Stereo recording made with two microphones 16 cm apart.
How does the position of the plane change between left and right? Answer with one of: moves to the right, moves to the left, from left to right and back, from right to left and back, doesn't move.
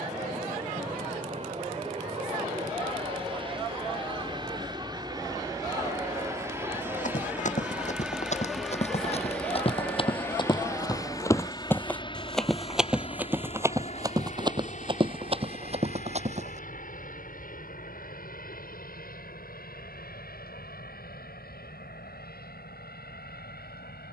moves to the left.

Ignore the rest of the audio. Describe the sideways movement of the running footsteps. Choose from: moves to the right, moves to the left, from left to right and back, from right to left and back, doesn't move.
moves to the right.